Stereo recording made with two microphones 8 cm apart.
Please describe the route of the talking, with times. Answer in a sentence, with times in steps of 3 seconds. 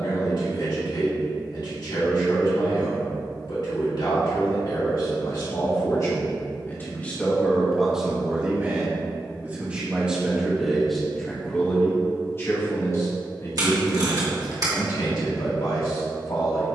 You can hear the talking on the left from 0 s, in the centre from 6 s and on the left from 12 s.